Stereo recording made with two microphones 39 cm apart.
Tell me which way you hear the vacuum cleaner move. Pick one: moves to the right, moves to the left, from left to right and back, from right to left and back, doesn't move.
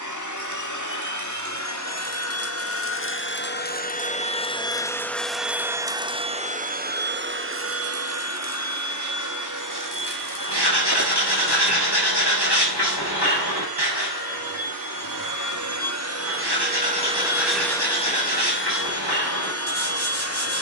from left to right and back.